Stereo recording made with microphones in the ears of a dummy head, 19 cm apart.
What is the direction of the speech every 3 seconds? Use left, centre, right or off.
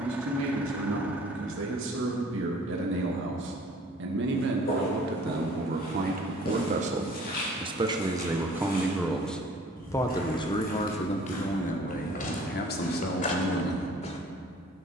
right, right, right, left, left.